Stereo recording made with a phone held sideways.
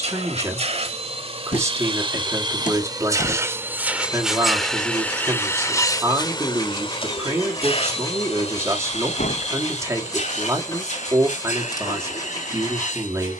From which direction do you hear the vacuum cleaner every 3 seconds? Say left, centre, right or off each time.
right, centre, left, left, left.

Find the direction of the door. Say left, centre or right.
left.